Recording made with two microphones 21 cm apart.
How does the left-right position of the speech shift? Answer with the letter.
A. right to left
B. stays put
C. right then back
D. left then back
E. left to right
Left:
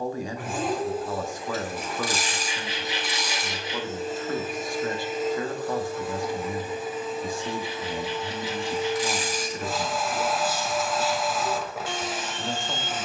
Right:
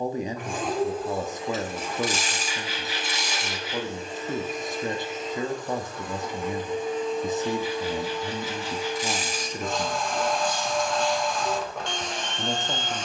B.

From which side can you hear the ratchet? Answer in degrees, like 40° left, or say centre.
20° right.